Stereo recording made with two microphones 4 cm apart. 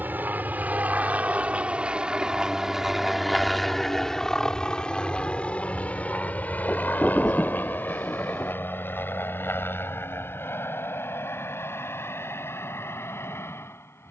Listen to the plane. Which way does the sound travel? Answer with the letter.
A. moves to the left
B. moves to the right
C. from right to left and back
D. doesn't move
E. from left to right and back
A.